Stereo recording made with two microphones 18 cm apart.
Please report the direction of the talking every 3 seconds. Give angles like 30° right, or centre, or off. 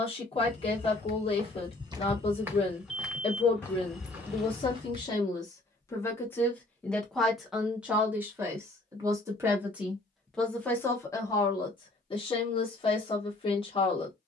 30° left, 30° left, centre, centre, 30° left.